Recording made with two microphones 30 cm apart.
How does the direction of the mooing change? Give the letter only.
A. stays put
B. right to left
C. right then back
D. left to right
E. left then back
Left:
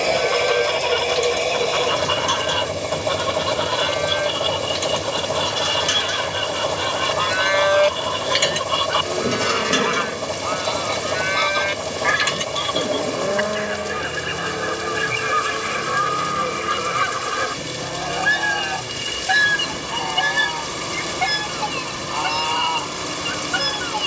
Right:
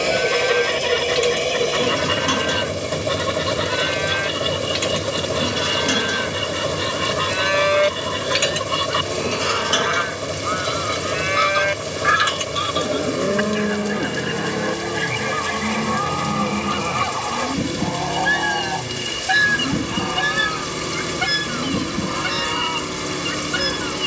E.